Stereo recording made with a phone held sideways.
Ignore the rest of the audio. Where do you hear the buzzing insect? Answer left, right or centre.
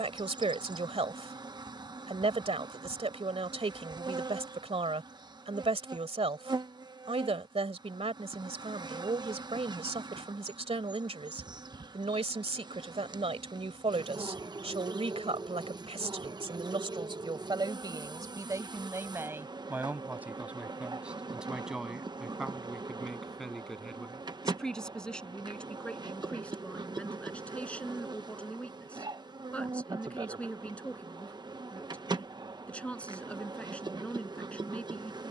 right.